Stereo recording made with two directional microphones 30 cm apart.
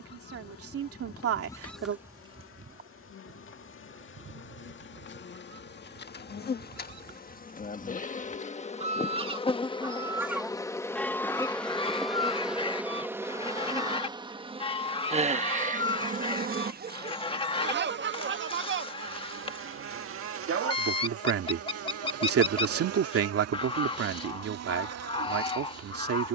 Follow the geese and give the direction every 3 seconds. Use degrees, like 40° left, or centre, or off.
centre, 50° right, 40° right, centre, 20° left, 20° left, 20° left, 20° left, 20° left.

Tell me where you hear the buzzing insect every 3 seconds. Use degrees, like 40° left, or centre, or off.
50° left, 40° left, 30° left, 10° left, 10° right, 30° right, 50° right, 60° right, 60° right.